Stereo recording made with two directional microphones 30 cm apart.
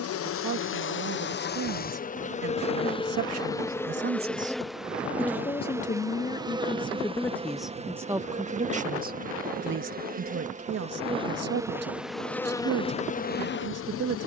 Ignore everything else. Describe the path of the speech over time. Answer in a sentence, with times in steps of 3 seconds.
In this clip you hear the speech on the right from 0 s, in the centre from 6 s and on the right from 9 s.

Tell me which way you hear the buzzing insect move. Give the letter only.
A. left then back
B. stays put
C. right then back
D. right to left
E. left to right
C.